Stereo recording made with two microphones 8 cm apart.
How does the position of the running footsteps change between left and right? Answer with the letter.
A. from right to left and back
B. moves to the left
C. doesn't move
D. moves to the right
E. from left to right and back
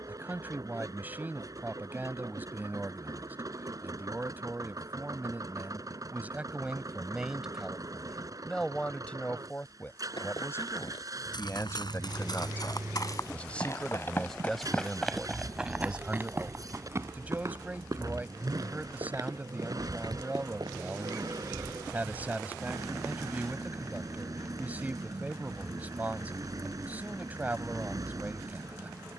D.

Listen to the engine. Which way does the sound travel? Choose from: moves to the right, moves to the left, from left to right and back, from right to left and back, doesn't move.
doesn't move.